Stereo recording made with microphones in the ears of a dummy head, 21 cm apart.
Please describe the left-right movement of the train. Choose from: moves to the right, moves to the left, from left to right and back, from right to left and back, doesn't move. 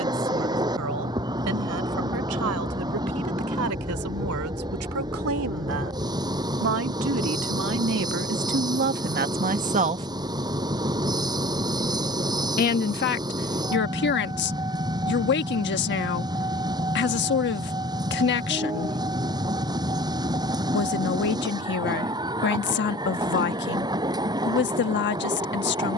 doesn't move.